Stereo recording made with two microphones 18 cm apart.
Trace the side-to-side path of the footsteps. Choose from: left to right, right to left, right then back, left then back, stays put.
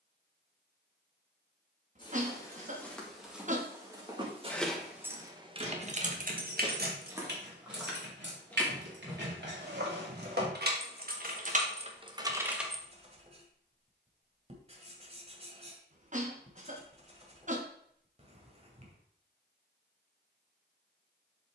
right then back.